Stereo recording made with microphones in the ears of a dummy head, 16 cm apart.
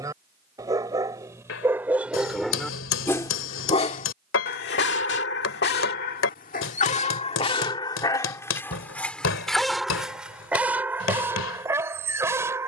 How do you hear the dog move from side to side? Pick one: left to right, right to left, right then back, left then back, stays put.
left then back.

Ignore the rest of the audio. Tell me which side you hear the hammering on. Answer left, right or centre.
left.